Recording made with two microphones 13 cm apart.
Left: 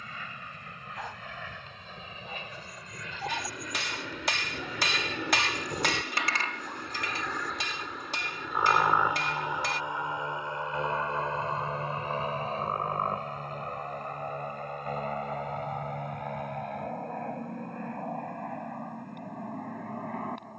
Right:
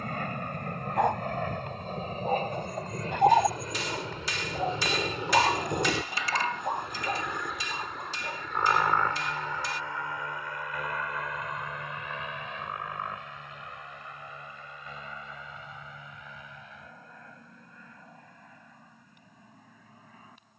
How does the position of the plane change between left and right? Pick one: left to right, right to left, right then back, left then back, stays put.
right to left.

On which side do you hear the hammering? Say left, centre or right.
left.